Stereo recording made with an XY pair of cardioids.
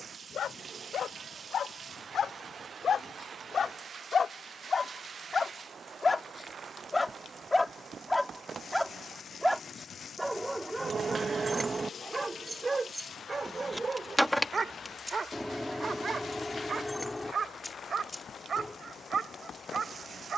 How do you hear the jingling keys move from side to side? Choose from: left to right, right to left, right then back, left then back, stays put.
right to left.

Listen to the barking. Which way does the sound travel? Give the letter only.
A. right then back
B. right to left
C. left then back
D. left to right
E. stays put
D.